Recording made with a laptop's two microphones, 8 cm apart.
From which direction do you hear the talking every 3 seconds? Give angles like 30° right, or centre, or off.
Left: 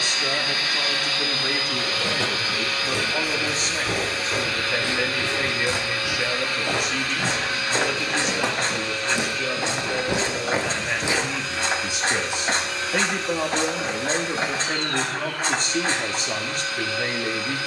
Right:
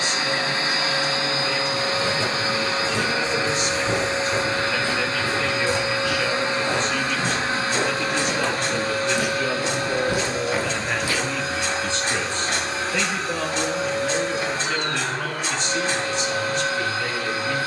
50° left, 30° left, 10° left, centre, 30° left, 50° left.